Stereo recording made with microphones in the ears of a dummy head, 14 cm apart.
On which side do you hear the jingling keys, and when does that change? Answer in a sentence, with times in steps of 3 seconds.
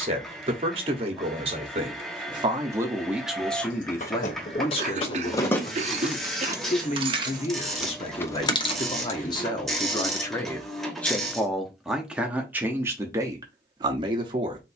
In this clip you hear the jingling keys not at all from 0 s, on the left from 3 s, in the centre from 6 s, on the left from 9 s and not at all from 12 s.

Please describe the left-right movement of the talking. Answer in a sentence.
You can hear the talking go left and come back.